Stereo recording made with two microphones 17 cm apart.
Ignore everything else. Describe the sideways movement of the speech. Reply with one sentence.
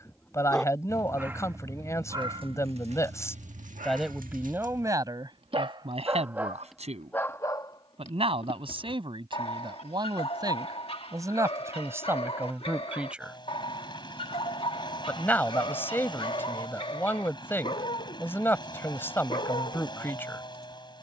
In this clip you hear the speech go right and come back.